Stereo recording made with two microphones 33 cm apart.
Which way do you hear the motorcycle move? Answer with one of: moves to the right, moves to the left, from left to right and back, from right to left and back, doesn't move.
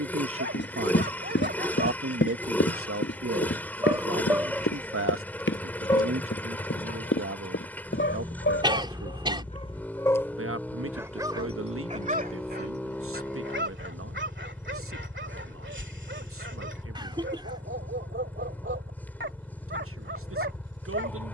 doesn't move.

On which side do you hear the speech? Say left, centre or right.
right.